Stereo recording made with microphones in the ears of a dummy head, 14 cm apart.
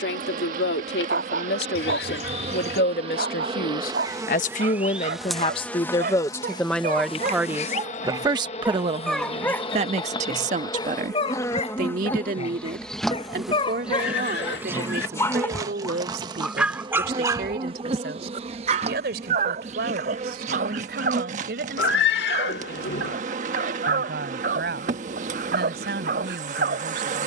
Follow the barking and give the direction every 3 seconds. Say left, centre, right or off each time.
right, right, right, left, left, centre, right, right, right.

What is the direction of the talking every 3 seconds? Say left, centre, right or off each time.
left, left, centre, right, right, right, right, right, right.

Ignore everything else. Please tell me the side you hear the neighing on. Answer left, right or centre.
left.